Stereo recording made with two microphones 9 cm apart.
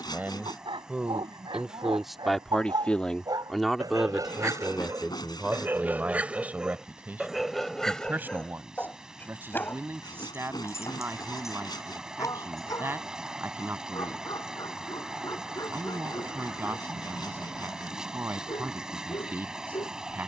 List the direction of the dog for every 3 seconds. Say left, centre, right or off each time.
right, right, centre, left, left, left, left.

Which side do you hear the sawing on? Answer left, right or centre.
left.